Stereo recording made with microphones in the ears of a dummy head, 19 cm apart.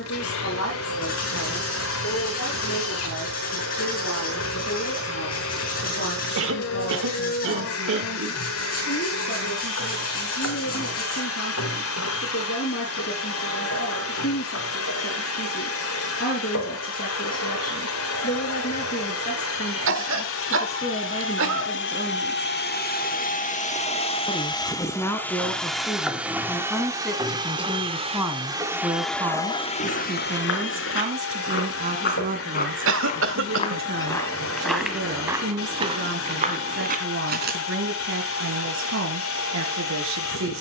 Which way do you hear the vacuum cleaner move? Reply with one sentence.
You can hear the vacuum cleaner go right and come back.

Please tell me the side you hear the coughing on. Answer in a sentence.
In this clip you hear the coughing on the right.